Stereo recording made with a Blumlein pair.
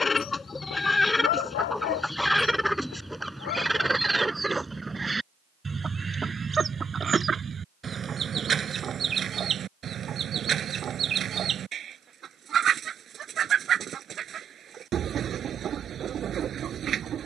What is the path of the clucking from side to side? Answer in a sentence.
In this clip you hear the clucking move to the right.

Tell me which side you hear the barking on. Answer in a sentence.
In this clip you hear the barking on the left.